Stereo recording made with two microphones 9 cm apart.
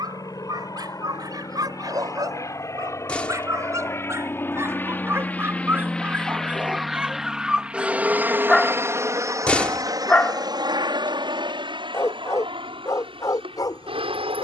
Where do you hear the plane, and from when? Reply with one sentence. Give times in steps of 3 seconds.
In this clip you hear the plane on the left from 0 s, in the centre from 6 s and on the right from 9 s.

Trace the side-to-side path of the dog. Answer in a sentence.
You can hear the dog go from the right side to the left.